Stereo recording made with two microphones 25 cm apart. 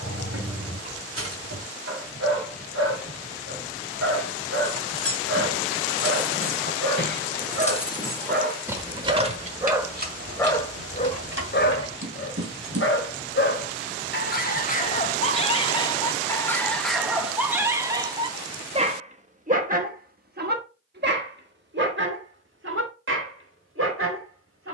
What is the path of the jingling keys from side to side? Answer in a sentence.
In this clip you hear the jingling keys go from the left side to the right.